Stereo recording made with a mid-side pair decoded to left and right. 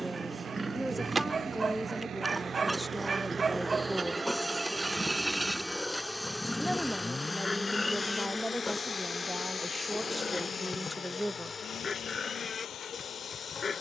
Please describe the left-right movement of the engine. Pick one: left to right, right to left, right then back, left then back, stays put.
right to left.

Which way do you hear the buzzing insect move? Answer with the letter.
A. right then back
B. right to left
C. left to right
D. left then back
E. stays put
B.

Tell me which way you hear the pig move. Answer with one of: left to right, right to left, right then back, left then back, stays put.
right to left.